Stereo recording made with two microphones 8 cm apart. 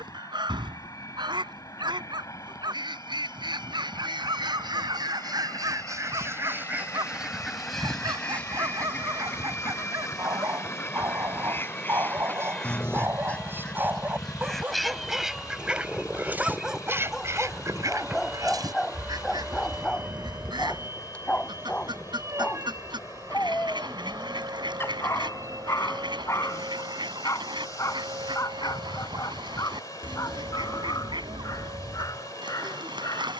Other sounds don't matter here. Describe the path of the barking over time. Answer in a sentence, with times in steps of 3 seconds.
In this clip you hear the barking on the right from 0 s, in the centre from 15 s and on the left from 21 s.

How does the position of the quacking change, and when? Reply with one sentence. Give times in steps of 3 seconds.
You can hear the quacking on the right from 0 s, in the centre from 6 s, on the left from 9 s, in the centre from 12 s and on the right from 15 s.